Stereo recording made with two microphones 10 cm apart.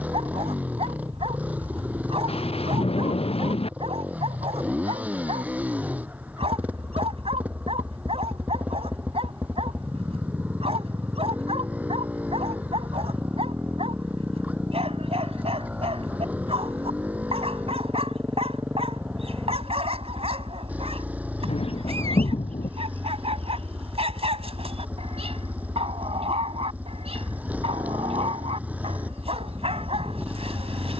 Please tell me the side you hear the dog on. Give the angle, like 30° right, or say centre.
80° right.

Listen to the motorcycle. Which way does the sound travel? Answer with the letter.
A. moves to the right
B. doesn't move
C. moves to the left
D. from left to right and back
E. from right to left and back
B.